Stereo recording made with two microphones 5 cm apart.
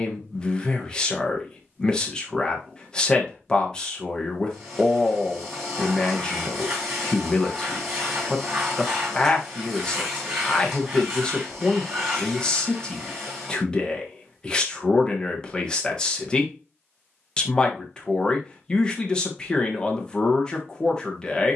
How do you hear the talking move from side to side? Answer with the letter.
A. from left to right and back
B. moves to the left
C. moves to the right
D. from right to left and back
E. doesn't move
E.